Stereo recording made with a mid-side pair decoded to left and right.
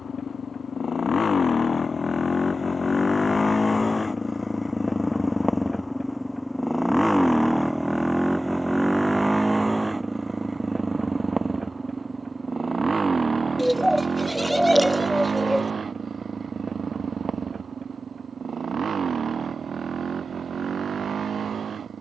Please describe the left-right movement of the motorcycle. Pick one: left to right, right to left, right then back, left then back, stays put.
left to right.